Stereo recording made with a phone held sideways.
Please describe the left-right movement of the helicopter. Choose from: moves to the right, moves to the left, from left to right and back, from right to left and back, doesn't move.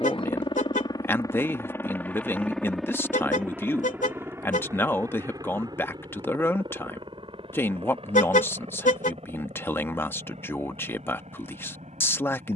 moves to the right.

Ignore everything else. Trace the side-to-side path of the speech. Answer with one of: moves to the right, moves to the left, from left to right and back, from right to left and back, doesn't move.
doesn't move.